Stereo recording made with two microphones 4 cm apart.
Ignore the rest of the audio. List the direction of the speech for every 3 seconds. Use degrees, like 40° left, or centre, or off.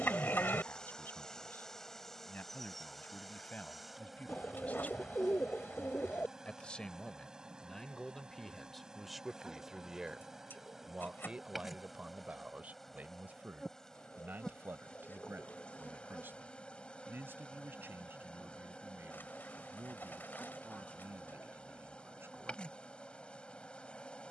50° left, 40° left, 10° left, 20° right, 50° right, 60° right, 70° right, 80° right.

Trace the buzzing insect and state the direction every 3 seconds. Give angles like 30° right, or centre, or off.
10° left, 10° right, 20° right, 10° right, 10° left, 30° left, 30° left, 30° left.